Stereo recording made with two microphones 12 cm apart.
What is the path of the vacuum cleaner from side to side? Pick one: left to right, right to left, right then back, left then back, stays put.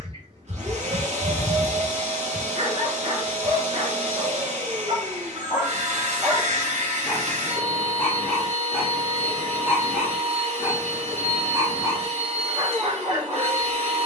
stays put.